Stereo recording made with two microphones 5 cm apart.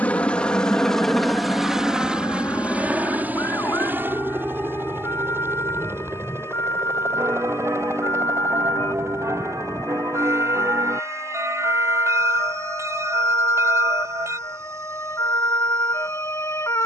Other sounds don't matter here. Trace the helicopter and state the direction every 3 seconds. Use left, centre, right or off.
centre, right, right, right, right, right.